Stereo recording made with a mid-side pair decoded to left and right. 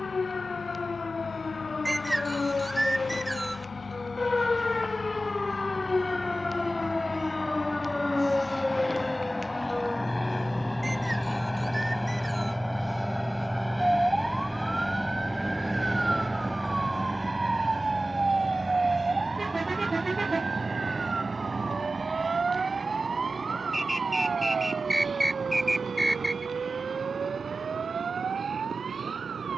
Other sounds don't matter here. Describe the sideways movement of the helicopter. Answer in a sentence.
You can hear the helicopter travel towards the right.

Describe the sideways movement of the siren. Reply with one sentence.
In this clip you hear the siren move from left to right.